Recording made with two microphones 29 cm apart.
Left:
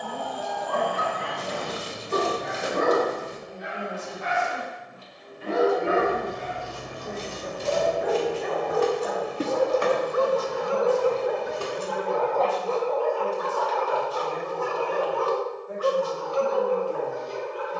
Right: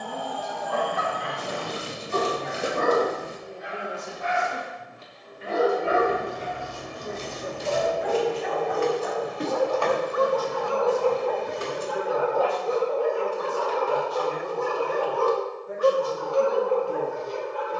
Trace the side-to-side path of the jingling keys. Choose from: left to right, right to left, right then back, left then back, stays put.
left to right.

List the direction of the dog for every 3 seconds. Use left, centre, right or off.
left, left, left, left, right, right.